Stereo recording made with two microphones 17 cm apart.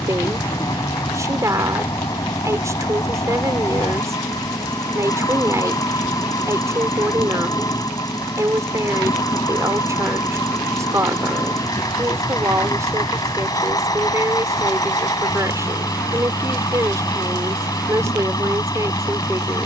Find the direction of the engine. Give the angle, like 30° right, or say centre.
20° left.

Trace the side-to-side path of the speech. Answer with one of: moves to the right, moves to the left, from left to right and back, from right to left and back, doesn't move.
doesn't move.